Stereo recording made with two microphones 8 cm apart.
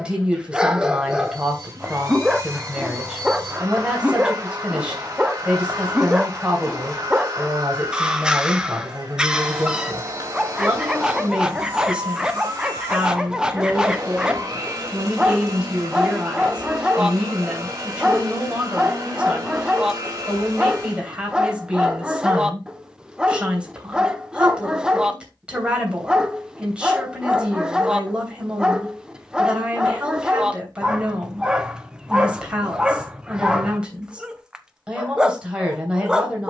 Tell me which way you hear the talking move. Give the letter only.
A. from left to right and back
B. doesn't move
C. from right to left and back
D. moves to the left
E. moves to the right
B.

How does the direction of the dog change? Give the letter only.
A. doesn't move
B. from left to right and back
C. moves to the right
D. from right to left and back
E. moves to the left
A.